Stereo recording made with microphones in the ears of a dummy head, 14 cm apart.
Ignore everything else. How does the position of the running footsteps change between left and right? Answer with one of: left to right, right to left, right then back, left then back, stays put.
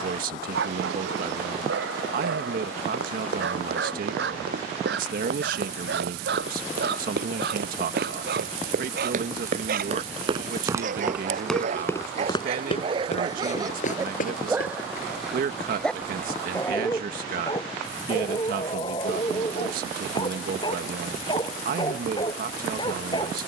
right to left.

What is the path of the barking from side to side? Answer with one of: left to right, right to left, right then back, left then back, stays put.
right to left.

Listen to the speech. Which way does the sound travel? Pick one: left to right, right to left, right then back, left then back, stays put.
stays put.